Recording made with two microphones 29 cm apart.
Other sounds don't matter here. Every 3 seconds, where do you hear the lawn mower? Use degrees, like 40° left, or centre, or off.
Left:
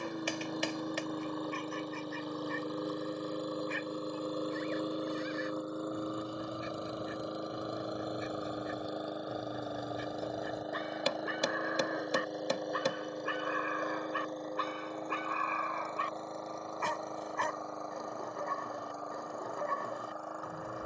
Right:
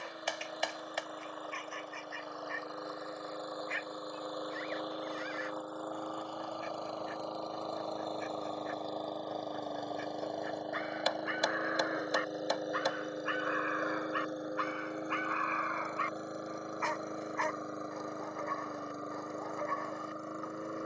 50° left, 30° left, 20° left, centre, 10° right, 20° right, 20° right.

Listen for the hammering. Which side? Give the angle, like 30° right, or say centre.
40° left.